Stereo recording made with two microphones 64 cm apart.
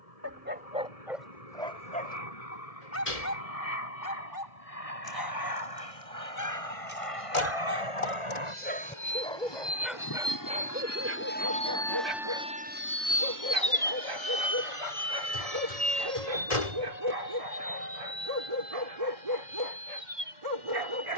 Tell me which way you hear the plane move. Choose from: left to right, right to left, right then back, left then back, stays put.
left to right.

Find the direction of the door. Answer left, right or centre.
left.